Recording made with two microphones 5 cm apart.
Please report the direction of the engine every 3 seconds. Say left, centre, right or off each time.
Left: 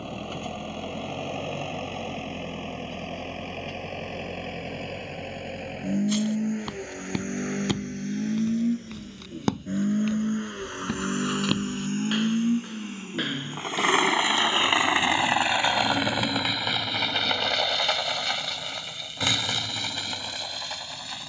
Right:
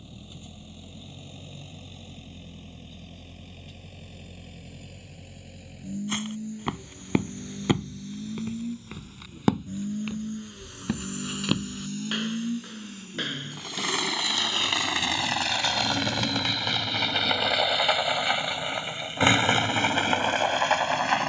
left, left, left, left, left, centre, right.